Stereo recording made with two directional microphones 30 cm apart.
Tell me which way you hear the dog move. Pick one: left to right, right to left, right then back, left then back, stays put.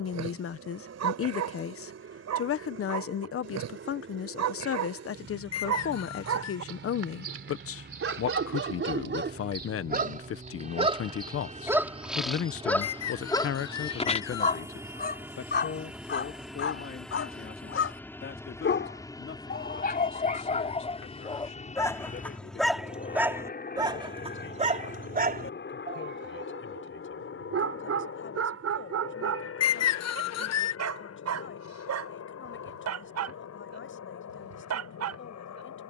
left then back.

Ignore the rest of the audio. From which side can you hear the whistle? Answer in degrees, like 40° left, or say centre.
60° left.